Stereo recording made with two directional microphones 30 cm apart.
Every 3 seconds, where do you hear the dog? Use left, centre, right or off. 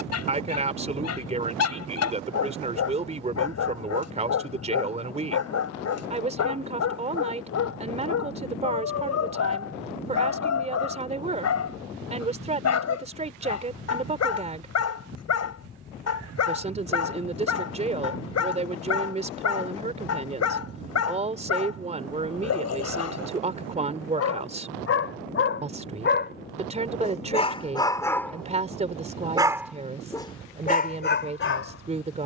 left, left, left, left, left, left, left, left, left, centre, left.